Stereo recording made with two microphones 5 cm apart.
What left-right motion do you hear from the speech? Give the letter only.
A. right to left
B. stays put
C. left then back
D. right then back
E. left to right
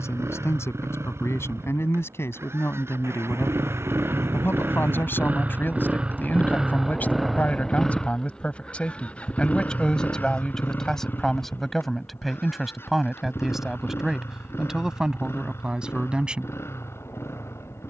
E.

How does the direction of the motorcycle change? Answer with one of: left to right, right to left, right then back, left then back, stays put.
right to left.